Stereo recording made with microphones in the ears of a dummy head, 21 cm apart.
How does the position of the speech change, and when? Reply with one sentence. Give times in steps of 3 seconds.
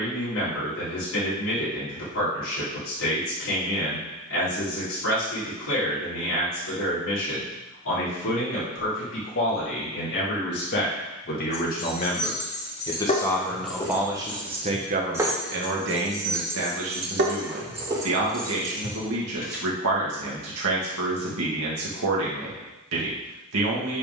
In this clip you hear the speech on the left from 0 s, in the centre from 12 s and on the right from 15 s.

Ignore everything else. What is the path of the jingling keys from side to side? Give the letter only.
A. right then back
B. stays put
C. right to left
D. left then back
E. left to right
A.